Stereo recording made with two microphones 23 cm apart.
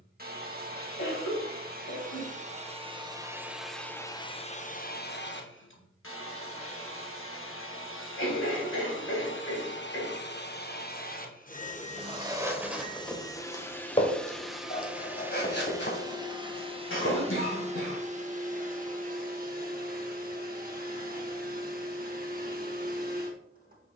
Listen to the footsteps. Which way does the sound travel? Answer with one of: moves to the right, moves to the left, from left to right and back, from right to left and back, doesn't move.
moves to the left.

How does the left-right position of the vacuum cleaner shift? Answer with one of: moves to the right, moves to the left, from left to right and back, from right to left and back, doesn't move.
from right to left and back.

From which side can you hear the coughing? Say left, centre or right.
left.